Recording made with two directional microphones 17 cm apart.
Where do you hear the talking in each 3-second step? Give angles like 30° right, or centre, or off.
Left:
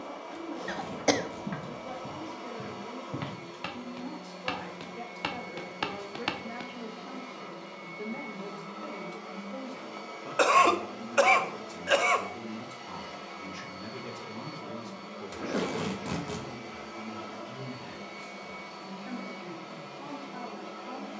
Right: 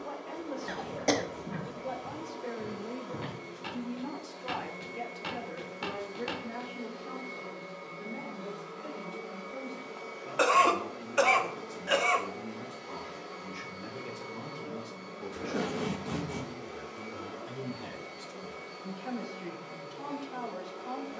50° right, 20° right, 20° left, 40° left, 20° left, 20° right, 40° right.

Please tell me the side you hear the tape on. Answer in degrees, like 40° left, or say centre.
70° left.